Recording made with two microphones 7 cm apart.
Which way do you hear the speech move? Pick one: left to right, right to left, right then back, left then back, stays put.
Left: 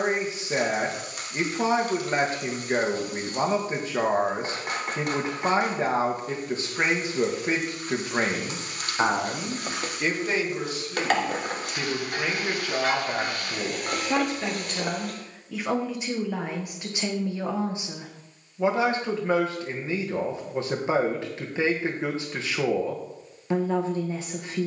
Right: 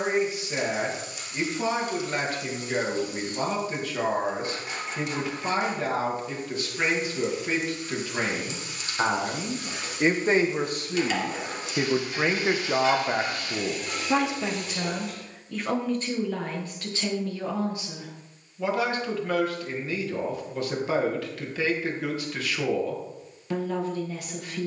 right then back.